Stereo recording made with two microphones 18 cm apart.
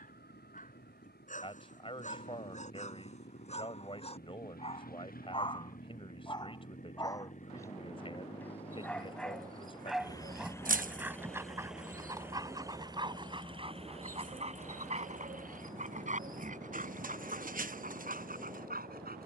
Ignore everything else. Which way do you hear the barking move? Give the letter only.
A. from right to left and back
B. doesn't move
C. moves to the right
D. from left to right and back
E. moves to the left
C.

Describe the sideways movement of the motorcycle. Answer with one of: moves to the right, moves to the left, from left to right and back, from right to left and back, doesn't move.
moves to the right.